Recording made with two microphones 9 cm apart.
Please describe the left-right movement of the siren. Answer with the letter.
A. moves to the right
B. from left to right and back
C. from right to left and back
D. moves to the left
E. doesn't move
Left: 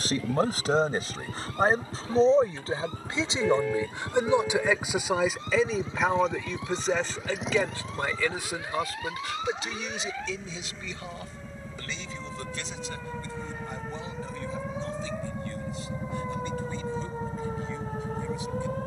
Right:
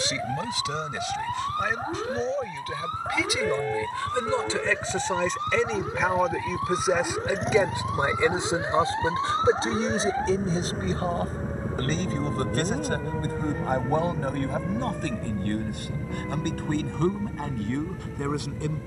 D.